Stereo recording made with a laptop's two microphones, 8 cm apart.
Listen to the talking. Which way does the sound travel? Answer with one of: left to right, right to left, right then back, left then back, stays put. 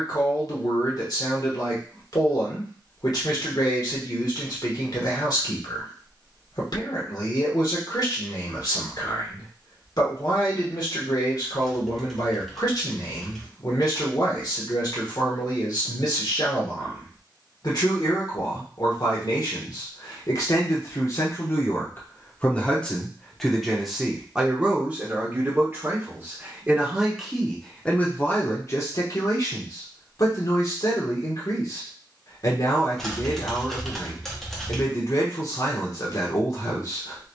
right then back.